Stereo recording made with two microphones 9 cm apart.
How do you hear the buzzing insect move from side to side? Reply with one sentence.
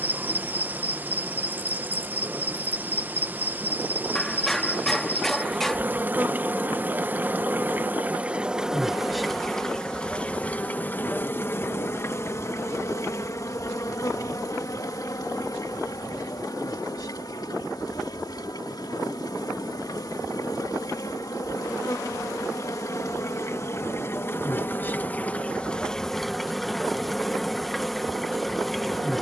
You can hear the buzzing insect go left and come back.